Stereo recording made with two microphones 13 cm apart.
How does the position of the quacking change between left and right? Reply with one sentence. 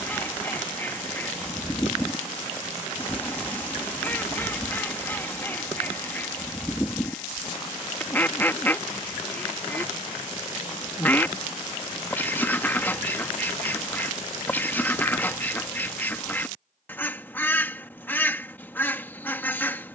You can hear the quacking stay put.